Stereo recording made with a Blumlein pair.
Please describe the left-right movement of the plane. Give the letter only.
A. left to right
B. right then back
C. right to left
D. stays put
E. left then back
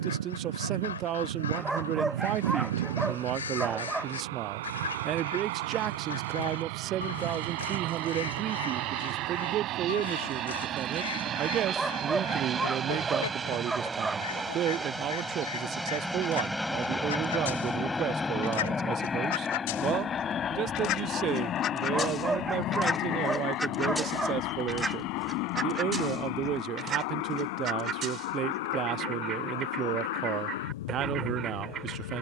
C.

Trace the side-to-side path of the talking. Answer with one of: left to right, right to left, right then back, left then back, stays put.
stays put.